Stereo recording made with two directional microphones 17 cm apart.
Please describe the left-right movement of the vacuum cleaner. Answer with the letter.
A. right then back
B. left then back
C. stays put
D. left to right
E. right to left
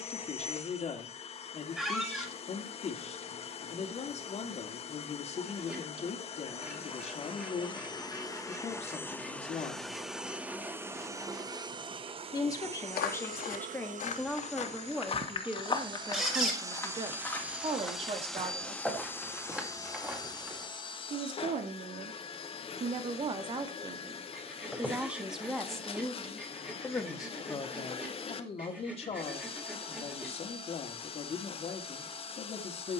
A.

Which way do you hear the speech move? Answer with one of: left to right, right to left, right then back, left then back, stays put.
right then back.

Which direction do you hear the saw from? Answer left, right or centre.
centre.